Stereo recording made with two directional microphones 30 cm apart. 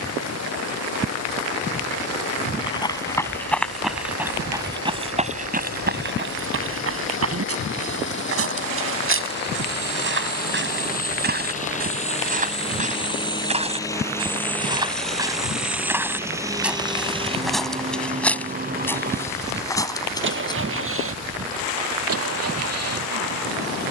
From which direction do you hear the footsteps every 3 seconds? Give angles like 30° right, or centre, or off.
10° left, 10° right, 50° right, 40° right, 20° right, centre, 10° left, off.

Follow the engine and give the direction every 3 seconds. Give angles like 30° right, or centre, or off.
50° left, 50° left, 40° left, 30° left, 10° left, 10° right, 30° right, 50° right.